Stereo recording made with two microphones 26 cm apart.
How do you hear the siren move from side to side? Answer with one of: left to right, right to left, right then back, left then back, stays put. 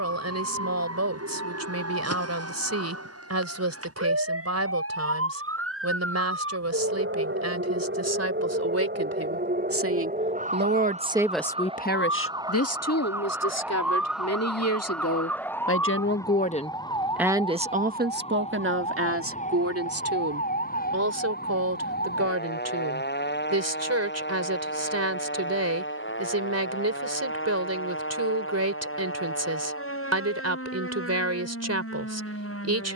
right to left.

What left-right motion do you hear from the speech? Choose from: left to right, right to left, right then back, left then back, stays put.
left then back.